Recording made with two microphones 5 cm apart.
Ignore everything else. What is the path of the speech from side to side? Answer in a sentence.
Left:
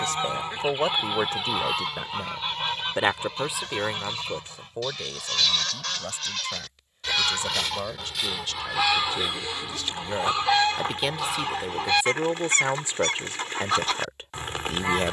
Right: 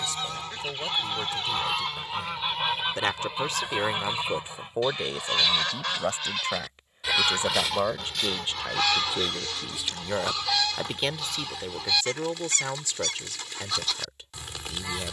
You can hear the speech go right and come back.